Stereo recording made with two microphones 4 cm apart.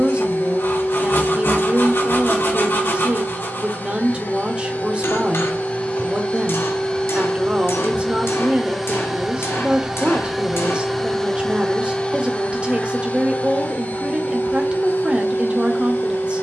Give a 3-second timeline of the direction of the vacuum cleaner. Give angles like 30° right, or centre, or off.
60° left, 40° left, 20° left, centre, 40° left, 50° left.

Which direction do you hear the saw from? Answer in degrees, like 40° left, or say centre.
60° left.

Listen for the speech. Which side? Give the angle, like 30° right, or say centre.
20° right.